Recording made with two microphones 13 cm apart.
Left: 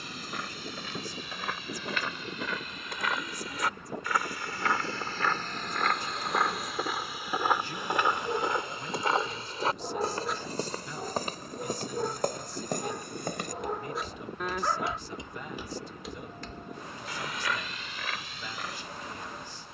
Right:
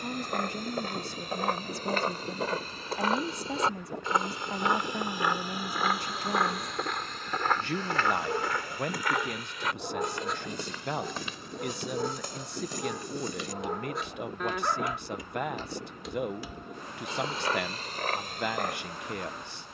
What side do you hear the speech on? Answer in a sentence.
In this clip you hear the speech on the right.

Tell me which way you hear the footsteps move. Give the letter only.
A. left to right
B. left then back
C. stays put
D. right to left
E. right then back
B.